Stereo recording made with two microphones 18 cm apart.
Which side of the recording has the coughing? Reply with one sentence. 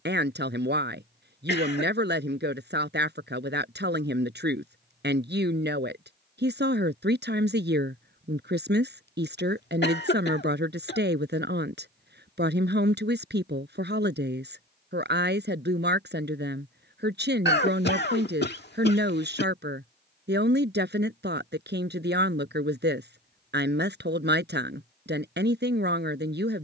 You can hear the coughing on the left.